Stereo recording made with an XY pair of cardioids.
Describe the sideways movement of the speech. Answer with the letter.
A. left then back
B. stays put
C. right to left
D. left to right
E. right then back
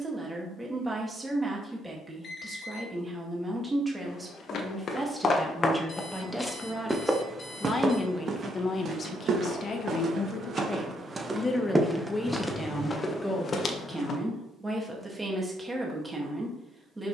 A.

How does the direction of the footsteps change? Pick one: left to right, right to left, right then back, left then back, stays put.
right then back.